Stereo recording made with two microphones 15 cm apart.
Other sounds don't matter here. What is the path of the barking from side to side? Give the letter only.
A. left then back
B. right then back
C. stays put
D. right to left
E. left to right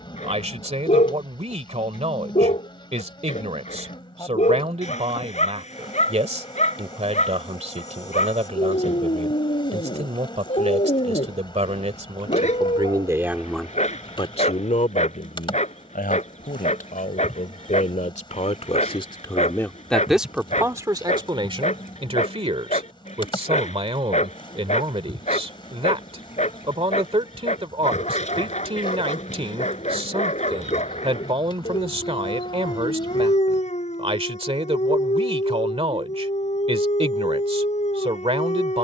C.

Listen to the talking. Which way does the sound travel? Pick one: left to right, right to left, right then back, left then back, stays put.
left then back.